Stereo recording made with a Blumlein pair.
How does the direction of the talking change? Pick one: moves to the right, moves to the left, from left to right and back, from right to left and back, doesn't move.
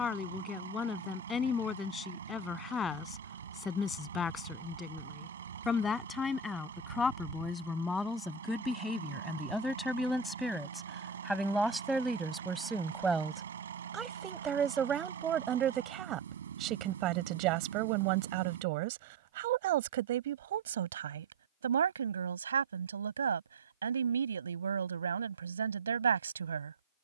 moves to the right.